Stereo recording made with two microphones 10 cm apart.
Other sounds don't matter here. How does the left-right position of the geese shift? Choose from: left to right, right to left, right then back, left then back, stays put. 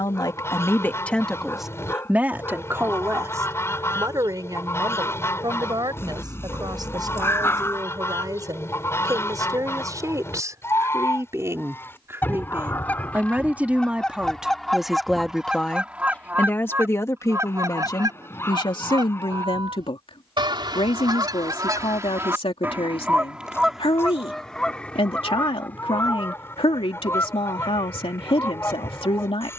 right then back.